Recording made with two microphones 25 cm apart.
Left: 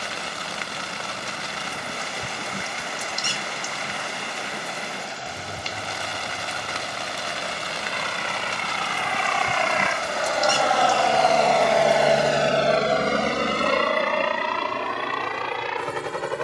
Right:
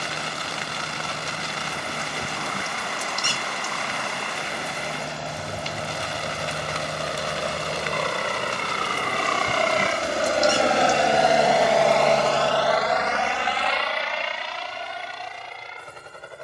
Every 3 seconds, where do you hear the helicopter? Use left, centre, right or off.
right, right, right, right, left, left.